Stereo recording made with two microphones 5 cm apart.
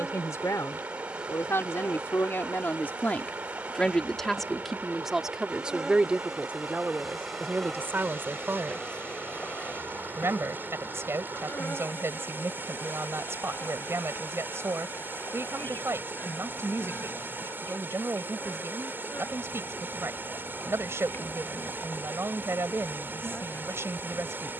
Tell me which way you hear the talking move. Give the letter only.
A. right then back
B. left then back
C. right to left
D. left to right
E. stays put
D.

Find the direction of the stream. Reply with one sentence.
You can hear the stream on the right.